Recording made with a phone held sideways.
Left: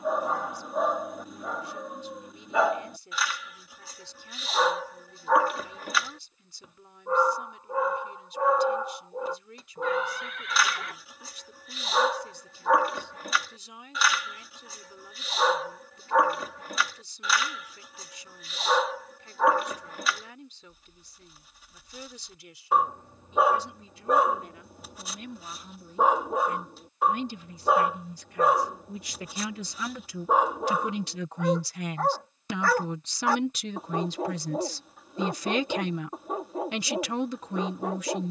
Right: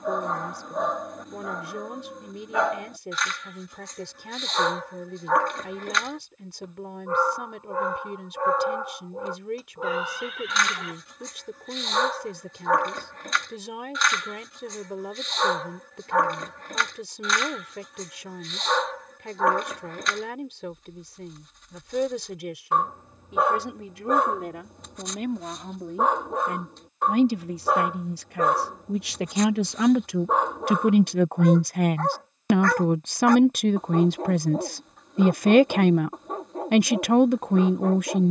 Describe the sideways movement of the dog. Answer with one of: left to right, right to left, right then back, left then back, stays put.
stays put.